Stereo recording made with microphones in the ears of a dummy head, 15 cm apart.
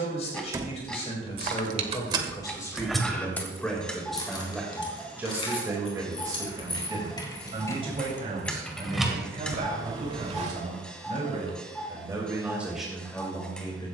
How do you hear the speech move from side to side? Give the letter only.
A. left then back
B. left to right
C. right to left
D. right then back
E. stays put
D.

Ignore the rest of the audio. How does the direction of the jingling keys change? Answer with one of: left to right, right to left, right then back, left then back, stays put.
left then back.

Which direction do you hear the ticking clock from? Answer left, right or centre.
centre.